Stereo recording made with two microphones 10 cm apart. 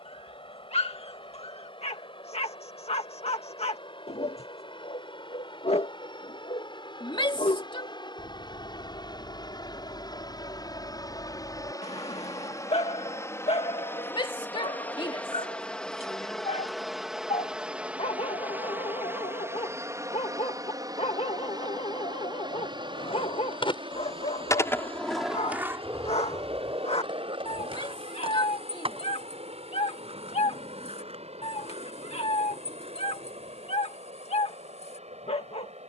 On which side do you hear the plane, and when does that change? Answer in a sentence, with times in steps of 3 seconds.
In this clip you hear the plane on the left from 0 s, in the centre from 15 s and on the right from 18 s.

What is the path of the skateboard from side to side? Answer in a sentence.
In this clip you hear the skateboard move to the right.